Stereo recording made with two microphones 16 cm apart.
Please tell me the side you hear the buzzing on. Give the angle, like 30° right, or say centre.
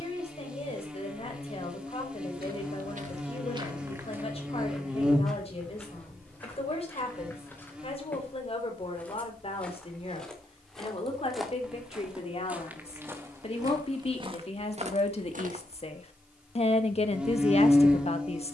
10° right.